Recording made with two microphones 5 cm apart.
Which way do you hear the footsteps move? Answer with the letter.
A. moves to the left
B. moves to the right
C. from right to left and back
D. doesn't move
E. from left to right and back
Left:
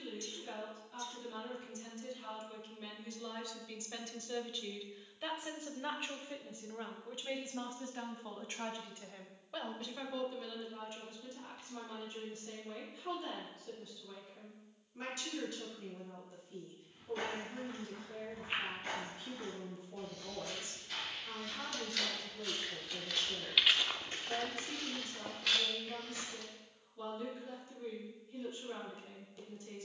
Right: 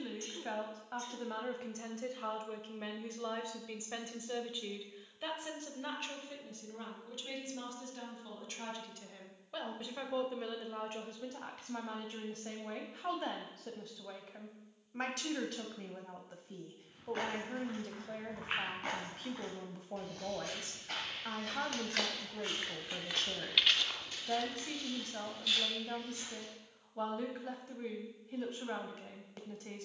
A.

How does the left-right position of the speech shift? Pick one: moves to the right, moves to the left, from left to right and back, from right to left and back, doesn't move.
from right to left and back.